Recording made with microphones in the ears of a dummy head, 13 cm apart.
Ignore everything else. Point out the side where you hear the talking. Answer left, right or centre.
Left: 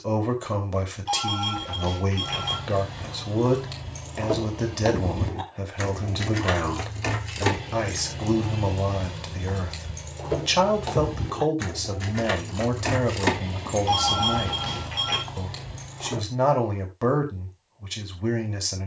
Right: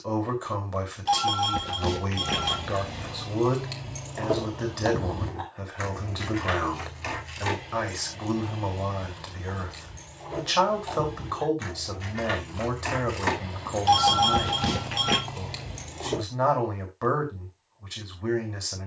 left.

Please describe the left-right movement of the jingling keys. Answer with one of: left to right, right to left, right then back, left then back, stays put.
left then back.